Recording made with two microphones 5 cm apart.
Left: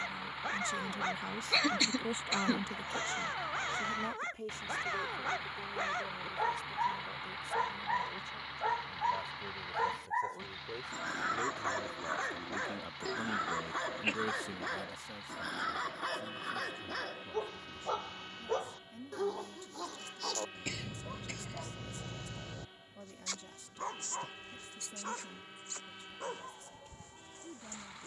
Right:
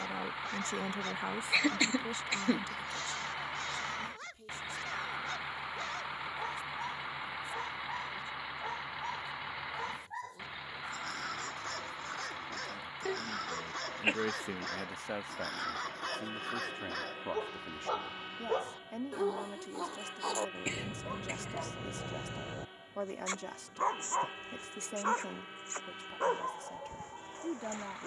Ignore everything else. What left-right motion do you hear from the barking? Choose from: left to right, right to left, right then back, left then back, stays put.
left to right.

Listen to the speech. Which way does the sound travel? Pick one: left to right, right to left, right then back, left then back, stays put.
left then back.